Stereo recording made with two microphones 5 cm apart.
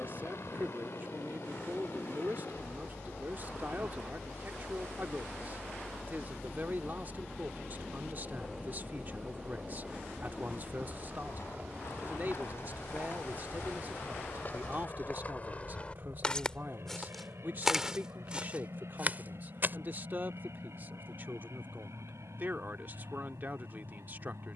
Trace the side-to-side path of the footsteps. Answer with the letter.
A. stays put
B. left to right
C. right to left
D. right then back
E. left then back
B.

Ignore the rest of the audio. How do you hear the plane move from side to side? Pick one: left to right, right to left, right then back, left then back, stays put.
left to right.